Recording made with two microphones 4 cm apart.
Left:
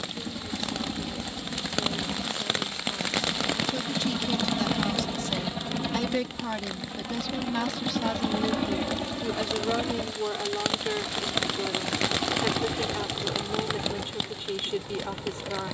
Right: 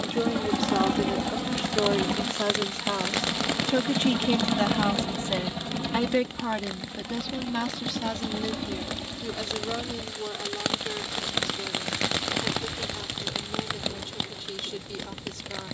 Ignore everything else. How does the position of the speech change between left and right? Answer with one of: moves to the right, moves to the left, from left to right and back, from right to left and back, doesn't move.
moves to the left.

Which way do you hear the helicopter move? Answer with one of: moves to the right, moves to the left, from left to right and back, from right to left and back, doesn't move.
moves to the left.